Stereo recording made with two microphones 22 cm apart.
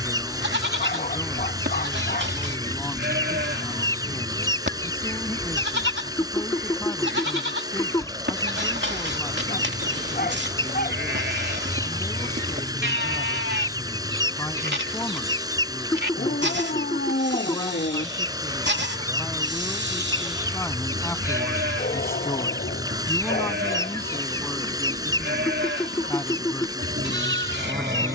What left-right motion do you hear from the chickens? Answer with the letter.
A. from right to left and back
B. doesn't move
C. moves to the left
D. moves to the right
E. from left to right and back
B.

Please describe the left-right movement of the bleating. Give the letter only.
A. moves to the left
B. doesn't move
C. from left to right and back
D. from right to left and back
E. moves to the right
B.